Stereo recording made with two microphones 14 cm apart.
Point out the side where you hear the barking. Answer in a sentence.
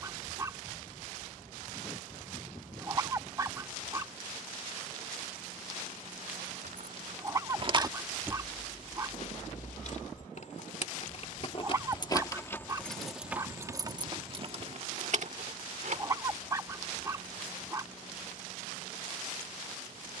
In this clip you hear the barking on the right.